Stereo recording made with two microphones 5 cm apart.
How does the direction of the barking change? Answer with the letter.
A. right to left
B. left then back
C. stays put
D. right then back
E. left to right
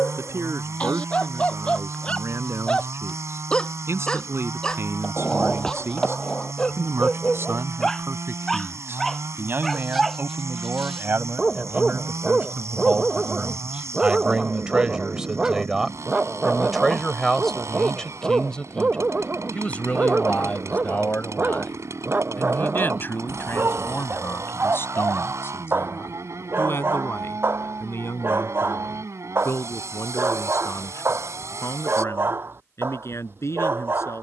E.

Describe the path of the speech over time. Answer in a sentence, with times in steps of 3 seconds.
In this clip you hear the speech on the right from 0 s, in the centre from 15 s and on the left from 18 s.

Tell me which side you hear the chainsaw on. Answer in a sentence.
In this clip you hear the chainsaw on the right.